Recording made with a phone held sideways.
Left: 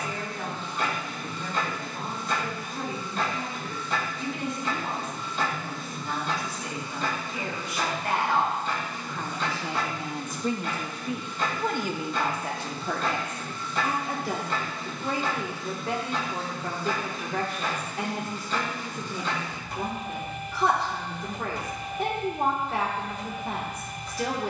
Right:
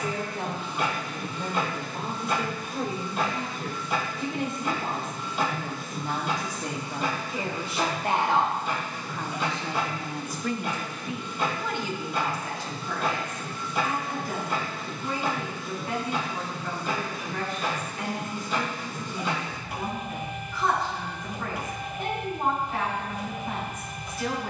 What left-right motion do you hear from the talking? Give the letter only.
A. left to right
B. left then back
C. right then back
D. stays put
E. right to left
E.